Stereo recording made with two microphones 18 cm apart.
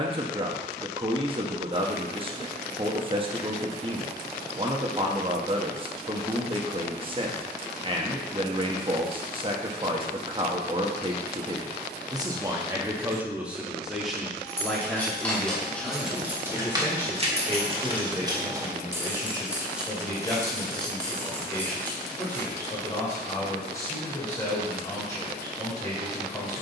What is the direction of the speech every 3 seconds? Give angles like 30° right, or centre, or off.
30° right, 30° right, 30° right, 30° right, 10° right, 10° left, 20° left, 20° left, 20° left.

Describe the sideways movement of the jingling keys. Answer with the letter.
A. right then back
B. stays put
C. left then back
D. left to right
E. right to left
A.